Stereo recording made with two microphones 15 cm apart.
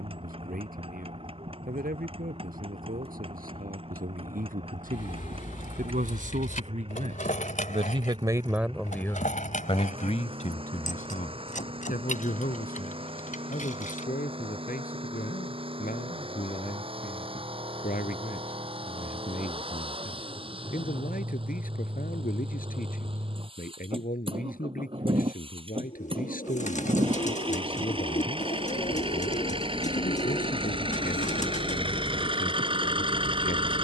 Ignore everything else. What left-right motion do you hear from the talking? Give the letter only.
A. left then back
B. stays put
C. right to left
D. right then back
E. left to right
C.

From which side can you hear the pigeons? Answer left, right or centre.
left.